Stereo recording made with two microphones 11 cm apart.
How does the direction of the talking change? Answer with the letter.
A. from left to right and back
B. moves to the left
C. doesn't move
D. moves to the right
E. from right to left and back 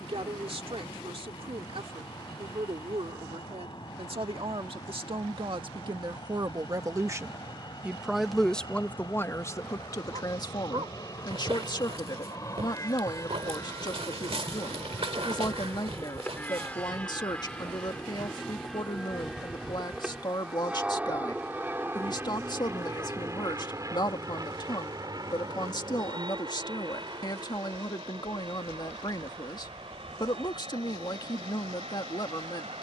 B.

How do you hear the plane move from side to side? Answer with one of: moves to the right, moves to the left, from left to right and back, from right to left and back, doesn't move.
moves to the right.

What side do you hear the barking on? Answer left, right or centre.
right.